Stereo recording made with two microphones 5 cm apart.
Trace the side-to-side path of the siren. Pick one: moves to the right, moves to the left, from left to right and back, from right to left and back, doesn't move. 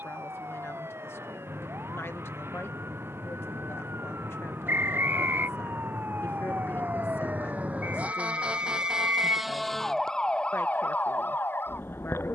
moves to the left.